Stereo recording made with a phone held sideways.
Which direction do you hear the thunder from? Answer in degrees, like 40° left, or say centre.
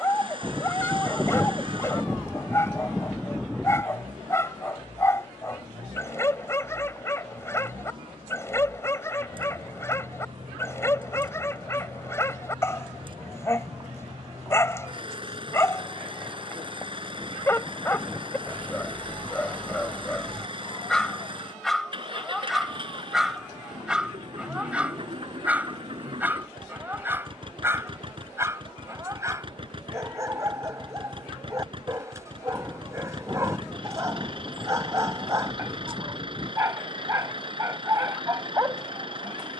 centre.